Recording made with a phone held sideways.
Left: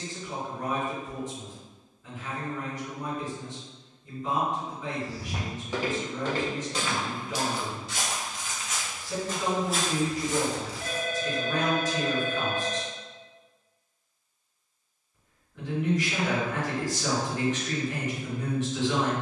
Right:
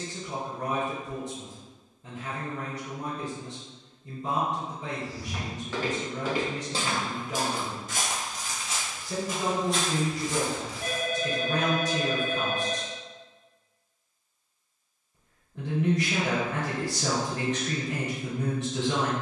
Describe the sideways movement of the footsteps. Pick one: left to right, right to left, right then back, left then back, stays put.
right then back.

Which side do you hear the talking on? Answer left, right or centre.
right.